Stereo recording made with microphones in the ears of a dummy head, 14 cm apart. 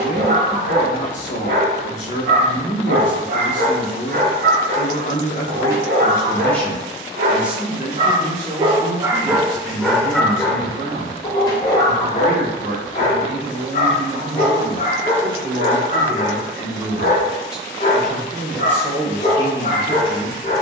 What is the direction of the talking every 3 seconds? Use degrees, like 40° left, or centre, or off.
50° left, 40° left, 10° right, 40° right, 40° right, 20° right, 20° left.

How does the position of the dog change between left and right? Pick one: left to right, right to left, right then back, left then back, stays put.
right to left.